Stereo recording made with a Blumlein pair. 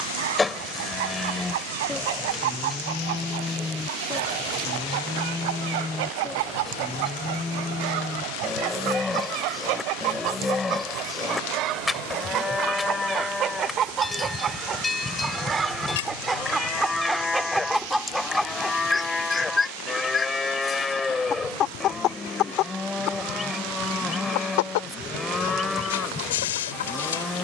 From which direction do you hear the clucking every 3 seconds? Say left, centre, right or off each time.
right, right, right, right, right, centre, centre, left, left.